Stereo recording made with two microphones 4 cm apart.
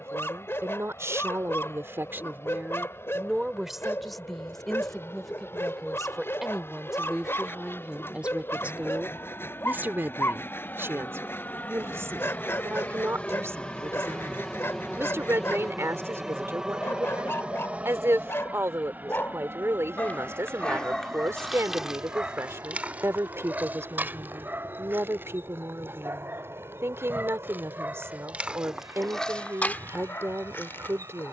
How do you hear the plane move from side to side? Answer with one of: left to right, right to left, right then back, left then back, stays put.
left to right.